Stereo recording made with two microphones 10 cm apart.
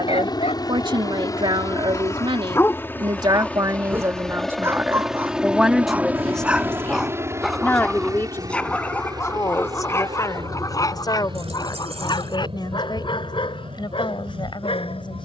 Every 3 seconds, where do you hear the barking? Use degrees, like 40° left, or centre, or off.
40° left, 20° right, centre, 30° left, 60° left.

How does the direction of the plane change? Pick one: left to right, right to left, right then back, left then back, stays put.
left to right.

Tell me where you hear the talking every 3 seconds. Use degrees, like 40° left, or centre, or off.
50° right, 20° right, 20° left, 40° left, 50° left.